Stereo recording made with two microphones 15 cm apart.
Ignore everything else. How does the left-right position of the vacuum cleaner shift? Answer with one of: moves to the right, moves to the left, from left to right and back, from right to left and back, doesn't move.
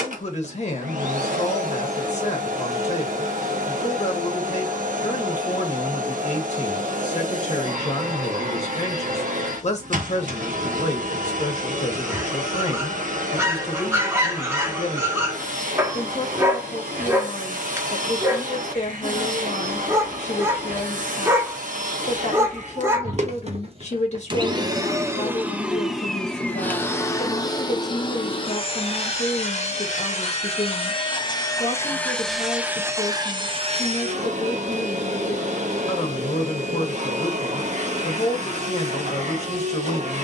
from right to left and back.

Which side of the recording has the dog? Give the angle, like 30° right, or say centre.
20° right.